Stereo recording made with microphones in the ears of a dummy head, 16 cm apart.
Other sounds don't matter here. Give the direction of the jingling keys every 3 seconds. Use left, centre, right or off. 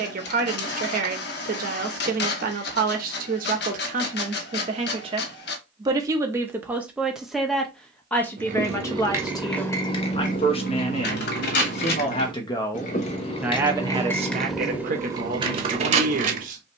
off, off, right, left, left, right.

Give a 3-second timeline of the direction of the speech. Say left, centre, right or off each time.
right, right, centre, left, centre, right.